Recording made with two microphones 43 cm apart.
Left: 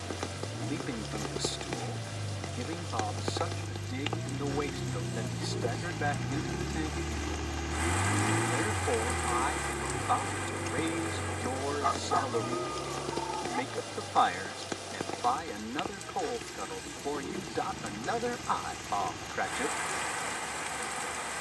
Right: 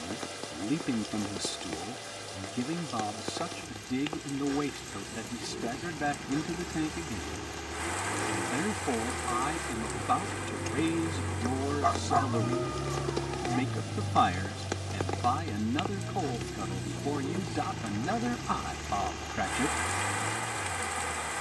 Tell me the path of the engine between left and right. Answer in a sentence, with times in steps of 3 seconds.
In this clip you hear the engine on the left from 0 s, in the centre from 9 s and on the right from 12 s.